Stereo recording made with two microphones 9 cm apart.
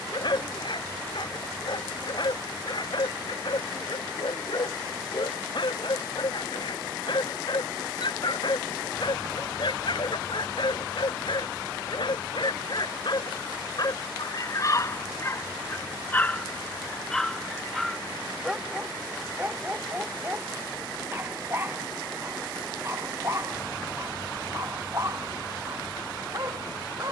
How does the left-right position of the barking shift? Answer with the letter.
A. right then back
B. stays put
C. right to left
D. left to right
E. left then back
D.